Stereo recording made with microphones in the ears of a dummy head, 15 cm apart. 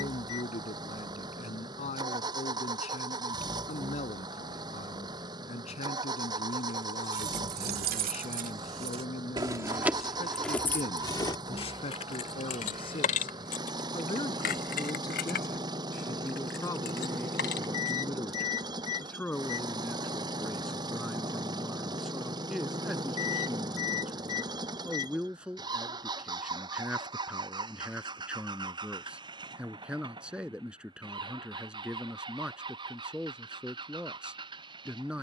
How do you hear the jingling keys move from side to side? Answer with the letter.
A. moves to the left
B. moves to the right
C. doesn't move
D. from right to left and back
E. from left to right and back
A.